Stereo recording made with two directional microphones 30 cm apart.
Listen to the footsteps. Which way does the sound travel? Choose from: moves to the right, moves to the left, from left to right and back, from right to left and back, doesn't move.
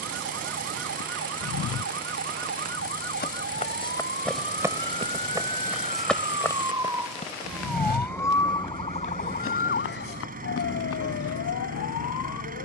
from left to right and back.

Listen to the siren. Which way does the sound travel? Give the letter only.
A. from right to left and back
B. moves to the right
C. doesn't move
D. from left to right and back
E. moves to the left
E.